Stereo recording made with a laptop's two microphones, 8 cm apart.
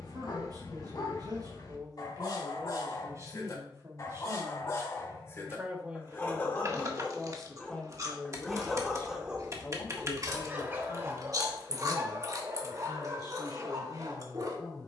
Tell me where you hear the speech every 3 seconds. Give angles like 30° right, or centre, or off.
50° right, 30° right, 10° left, 50° left, 60° left.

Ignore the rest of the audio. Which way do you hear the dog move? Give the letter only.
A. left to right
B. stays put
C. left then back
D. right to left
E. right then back
A.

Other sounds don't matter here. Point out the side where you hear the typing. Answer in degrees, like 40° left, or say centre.
40° right.